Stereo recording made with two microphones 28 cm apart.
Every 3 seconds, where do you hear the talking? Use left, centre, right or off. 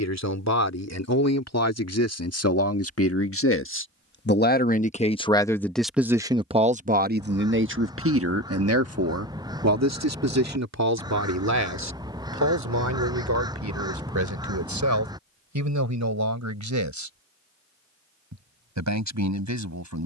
left, left, right, right, right, right, right.